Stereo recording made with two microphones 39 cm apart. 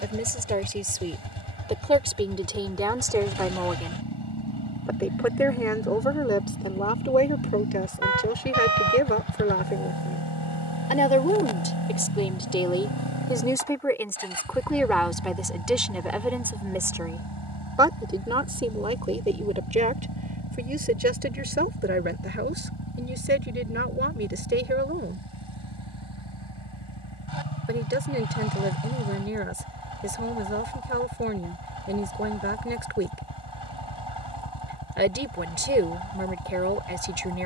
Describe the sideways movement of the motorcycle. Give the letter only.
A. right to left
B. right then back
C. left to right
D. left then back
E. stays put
E.